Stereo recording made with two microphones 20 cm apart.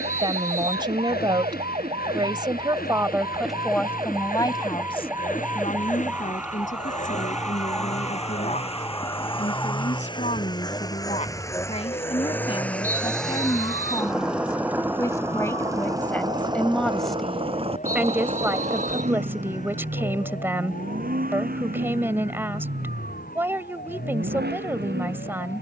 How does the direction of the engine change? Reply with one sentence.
You can hear the engine travel towards the right.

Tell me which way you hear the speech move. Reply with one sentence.
In this clip you hear the speech move from right to left and back again.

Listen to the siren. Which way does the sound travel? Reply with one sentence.
You can hear the siren travel towards the left.